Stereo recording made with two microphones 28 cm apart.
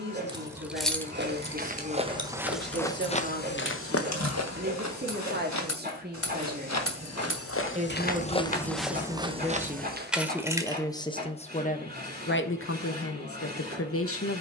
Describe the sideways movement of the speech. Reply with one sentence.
In this clip you hear the speech move from right to left.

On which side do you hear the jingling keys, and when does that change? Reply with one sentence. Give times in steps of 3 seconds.
You can hear the jingling keys on the left from 0 s, in the centre from 9 s and not at all from 12 s.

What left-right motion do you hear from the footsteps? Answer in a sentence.
You can hear the footsteps go left and come back.